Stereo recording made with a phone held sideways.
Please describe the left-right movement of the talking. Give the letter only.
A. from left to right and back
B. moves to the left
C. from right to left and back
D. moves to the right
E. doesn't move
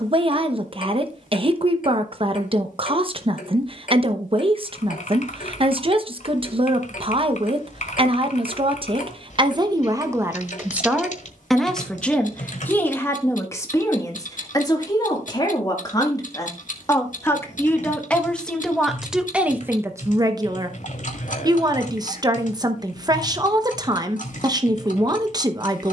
C.